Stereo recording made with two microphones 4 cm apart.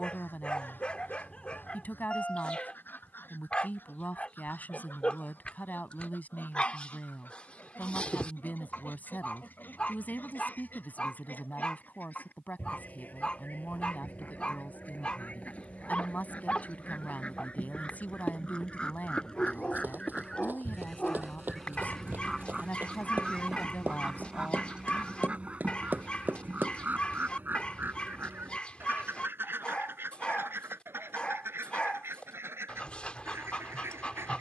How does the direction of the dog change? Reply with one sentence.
You can hear the dog stay put.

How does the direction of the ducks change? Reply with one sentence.
You can hear the ducks go from the left side to the right.